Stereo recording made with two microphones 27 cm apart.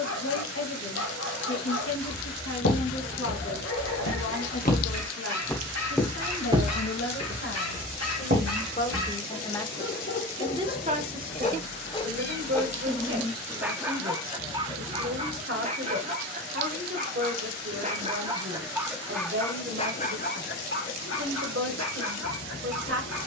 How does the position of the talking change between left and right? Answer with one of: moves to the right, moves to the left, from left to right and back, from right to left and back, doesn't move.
moves to the right.